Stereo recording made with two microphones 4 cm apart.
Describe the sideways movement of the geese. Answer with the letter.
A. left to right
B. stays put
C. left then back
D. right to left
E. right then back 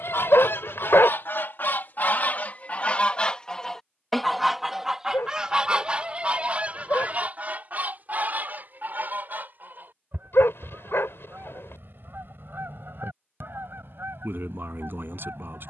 A.